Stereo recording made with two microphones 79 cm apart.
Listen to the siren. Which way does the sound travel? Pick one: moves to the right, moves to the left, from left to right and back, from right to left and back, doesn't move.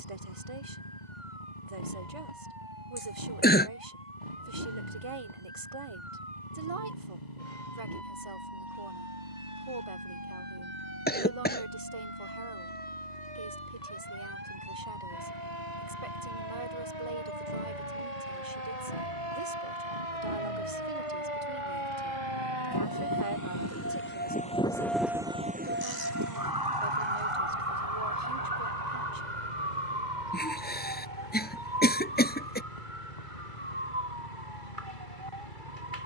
moves to the right.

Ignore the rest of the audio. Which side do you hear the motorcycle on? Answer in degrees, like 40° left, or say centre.
60° left.